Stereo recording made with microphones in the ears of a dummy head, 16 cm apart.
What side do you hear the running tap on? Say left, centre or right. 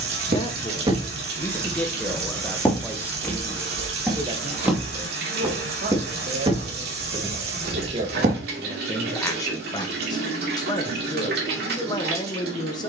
right.